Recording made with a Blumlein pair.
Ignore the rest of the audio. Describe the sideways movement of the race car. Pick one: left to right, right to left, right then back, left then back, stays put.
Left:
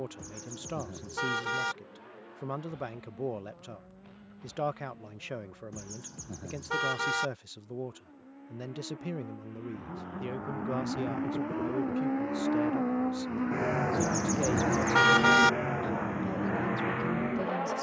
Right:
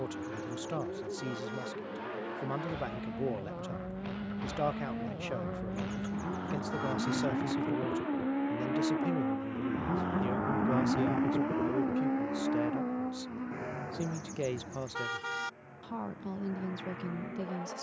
right to left.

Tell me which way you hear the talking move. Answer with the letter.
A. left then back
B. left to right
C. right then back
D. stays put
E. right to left
D.